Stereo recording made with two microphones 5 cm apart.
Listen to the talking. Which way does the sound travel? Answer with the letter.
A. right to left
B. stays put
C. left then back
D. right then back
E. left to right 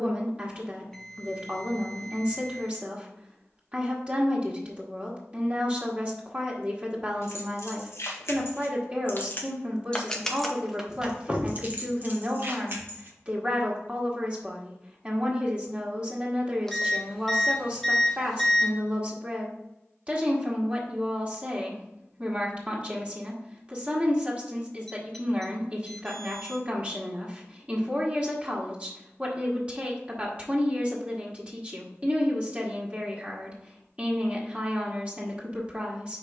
B.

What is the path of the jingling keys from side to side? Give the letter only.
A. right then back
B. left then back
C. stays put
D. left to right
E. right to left
D.